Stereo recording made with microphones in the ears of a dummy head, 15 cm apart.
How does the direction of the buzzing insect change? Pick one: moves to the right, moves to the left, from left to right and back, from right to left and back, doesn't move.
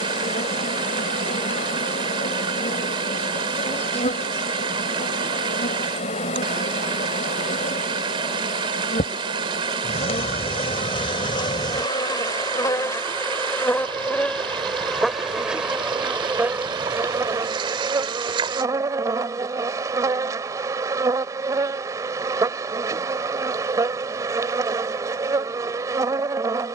moves to the right.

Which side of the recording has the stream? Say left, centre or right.
right.